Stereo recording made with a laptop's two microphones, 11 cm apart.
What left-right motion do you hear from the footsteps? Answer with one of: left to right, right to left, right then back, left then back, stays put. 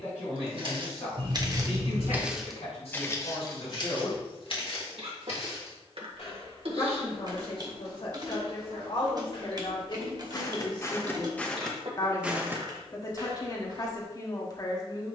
left then back.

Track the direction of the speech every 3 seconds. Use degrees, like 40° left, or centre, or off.
70° left, 70° left, 60° left, 50° left, 40° left.